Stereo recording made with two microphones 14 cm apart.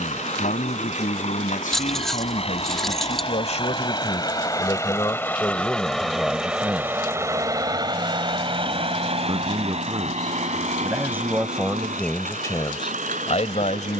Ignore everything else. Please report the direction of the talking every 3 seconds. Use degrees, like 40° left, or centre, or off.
80° left, 40° left, centre, 20° right, 40° left.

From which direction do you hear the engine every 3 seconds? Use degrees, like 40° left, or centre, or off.
50° left, 30° left, 20° right, 60° right, 70° right.